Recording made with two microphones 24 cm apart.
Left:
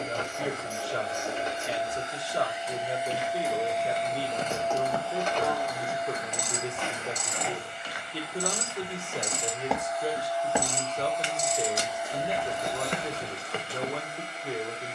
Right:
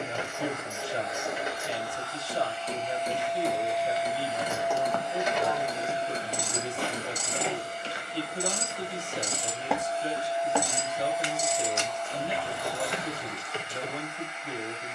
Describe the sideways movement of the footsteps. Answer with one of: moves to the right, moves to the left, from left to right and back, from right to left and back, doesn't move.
from left to right and back.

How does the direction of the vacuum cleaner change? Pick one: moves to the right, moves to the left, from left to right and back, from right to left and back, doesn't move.
from left to right and back.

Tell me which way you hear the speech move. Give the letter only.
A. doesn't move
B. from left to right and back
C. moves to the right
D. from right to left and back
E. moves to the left
A.